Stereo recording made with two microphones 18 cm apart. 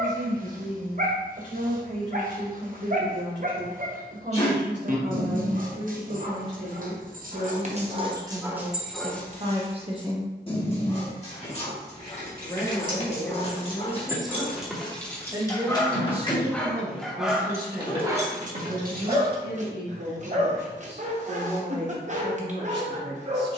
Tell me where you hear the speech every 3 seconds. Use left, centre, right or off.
right, right, right, right, centre, right, right, right.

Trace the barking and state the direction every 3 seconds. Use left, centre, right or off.
right, right, right, left, left, centre, right, right.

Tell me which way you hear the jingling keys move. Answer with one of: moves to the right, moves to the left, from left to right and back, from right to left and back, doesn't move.
from right to left and back.